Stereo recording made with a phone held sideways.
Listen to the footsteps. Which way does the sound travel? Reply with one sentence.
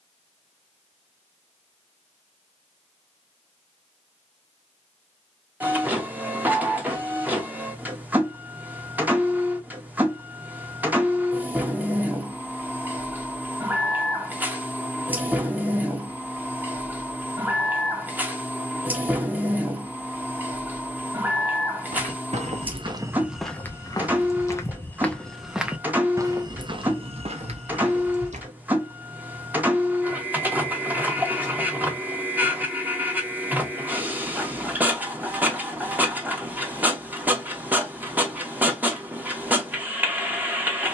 You can hear the footsteps go left and come back.